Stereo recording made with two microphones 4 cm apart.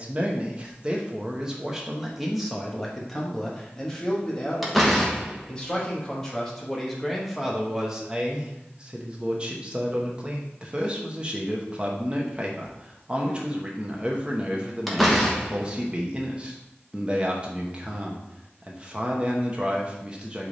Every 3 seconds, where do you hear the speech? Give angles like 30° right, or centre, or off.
10° right, 10° left, centre, 20° right, 20° right, 20° right, 20° right.